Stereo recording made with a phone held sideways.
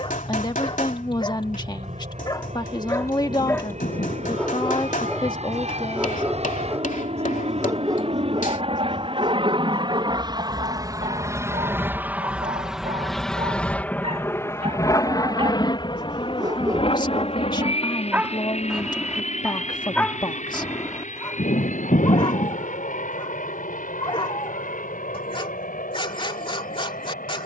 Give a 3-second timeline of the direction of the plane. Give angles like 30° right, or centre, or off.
70° right, 70° right, 60° right, 30° right, 10° left, 40° left, 50° left, 60° left, 70° left.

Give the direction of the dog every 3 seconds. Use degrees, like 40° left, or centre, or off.
40° left, 10° left, 20° right, 40° right, 50° right, 30° right, 10° left, 40° left, 40° left.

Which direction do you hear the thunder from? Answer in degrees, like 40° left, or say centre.
70° left.